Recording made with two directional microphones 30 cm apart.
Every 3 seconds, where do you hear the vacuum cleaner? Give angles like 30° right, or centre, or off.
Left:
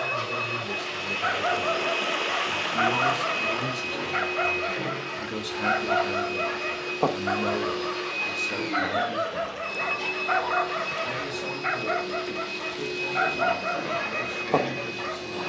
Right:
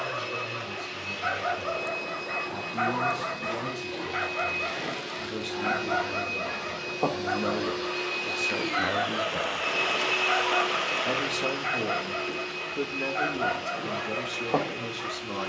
60° left, 40° left, 10° left, centre, 40° left.